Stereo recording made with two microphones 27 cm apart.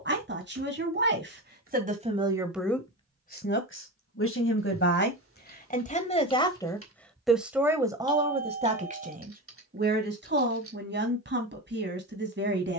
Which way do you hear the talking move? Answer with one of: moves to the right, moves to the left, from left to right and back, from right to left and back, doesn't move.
from right to left and back.